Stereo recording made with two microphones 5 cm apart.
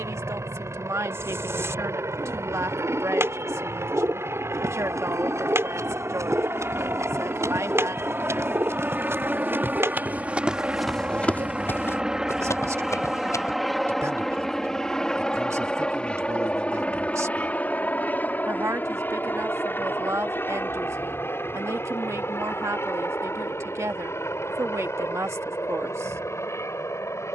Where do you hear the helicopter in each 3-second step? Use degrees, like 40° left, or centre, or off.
70° right, 60° right, 40° right, 30° right, centre, 20° left, 40° left, 50° left, 50° left.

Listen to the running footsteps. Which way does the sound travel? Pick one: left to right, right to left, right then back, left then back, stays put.
right to left.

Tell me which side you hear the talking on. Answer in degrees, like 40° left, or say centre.
70° right.